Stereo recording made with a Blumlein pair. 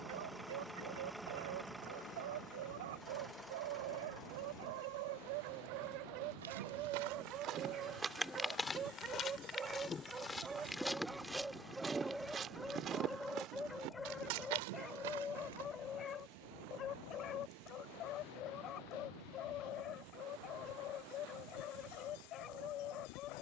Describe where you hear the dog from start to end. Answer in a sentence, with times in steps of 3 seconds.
You can hear the dog on the right from 0 s, in the centre from 9 s and on the left from 15 s.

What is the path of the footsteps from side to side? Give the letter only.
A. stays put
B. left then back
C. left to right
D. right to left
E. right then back
B.